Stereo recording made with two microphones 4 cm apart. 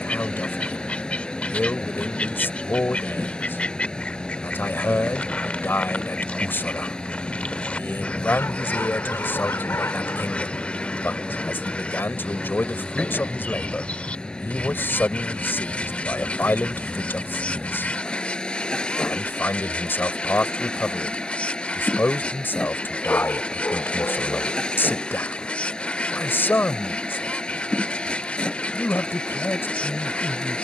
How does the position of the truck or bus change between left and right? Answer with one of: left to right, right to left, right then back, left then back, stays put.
stays put.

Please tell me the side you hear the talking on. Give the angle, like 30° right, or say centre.
60° left.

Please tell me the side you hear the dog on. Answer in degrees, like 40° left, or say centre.
70° left.